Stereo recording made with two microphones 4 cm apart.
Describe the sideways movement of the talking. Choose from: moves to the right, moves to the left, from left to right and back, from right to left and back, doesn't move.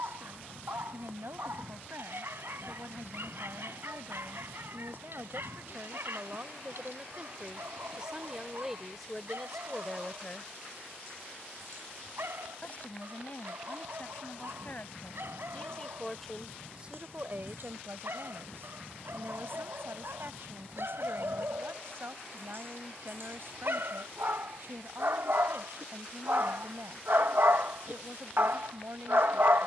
from right to left and back.